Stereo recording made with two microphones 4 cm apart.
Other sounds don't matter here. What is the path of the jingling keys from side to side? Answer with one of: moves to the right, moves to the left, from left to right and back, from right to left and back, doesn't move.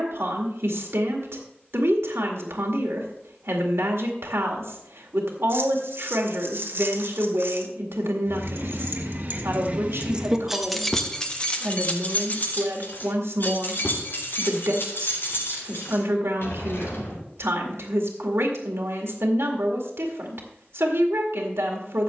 moves to the left.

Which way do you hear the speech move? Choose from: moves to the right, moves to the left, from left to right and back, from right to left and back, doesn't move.
doesn't move.